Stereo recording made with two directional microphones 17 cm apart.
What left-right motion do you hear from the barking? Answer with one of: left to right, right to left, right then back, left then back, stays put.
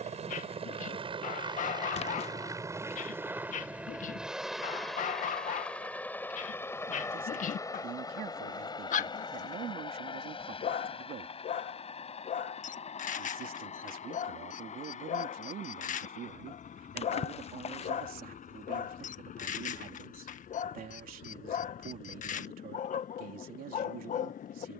stays put.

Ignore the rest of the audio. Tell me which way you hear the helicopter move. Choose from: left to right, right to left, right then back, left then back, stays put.
right to left.